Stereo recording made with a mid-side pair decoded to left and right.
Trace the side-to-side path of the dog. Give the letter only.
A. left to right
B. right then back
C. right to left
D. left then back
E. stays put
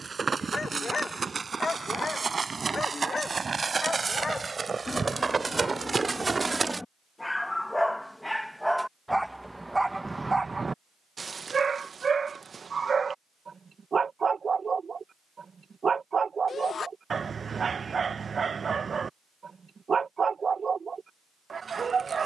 A.